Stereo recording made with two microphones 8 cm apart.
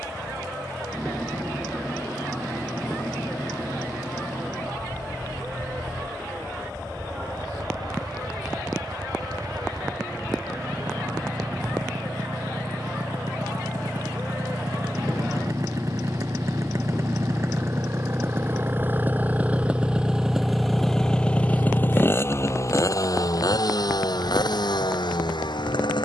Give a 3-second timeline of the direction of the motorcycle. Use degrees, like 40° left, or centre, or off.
60° right, 60° right, 60° right, 60° right, 50° right, 40° right, 20° right, 40° left, 70° left.